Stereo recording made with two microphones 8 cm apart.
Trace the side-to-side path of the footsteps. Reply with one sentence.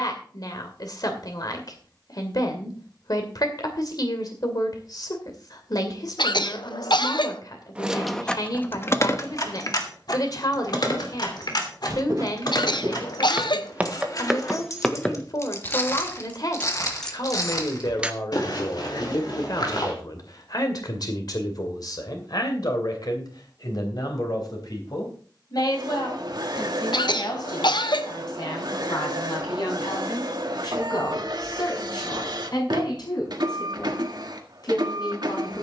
You can hear the footsteps go from the right side to the left.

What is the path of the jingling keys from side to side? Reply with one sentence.
In this clip you hear the jingling keys go left and come back.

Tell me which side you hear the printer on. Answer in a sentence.
You can hear the printer on the right.